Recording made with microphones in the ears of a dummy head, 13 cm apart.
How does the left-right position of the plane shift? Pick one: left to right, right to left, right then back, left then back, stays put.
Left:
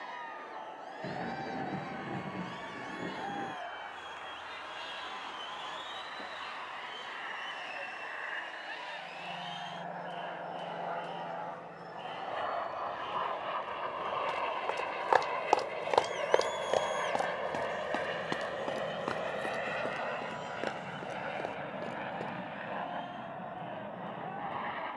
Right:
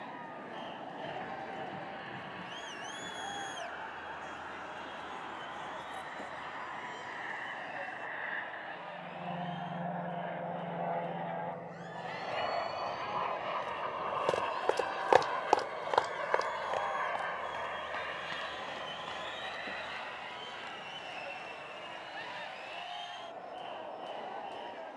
right to left.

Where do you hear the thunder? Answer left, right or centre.
left.